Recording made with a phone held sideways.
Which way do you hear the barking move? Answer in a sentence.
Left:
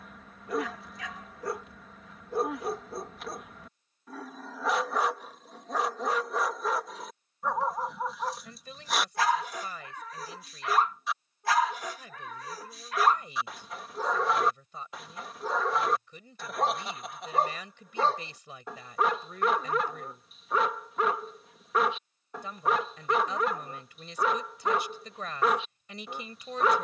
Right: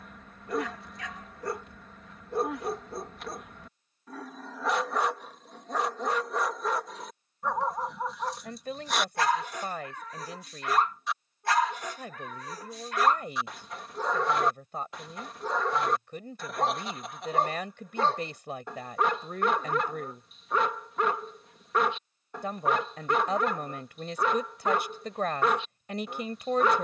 You can hear the barking stay in one place.